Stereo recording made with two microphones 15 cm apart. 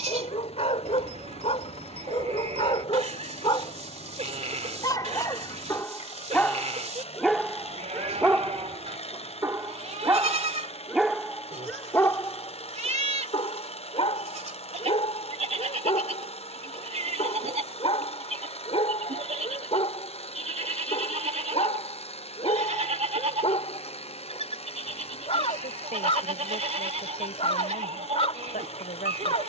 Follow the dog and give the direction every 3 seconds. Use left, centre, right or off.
left, left, centre, centre, left, left, left, left, left, left.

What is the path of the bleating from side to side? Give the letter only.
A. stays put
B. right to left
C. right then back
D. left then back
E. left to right
A.